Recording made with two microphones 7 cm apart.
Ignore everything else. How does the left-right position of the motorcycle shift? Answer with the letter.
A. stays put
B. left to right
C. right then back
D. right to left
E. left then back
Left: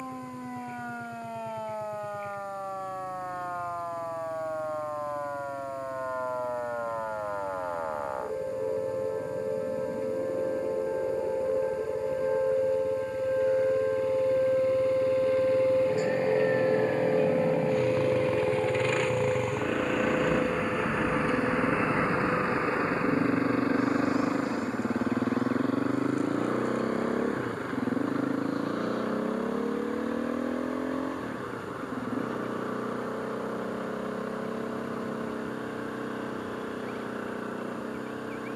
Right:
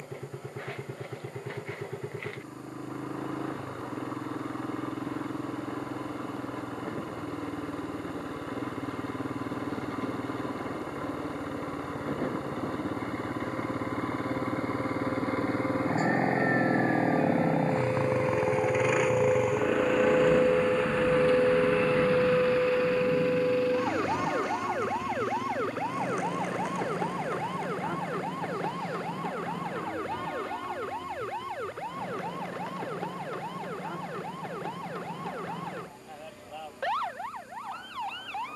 D.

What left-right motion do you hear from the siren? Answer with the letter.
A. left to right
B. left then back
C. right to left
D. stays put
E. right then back
A.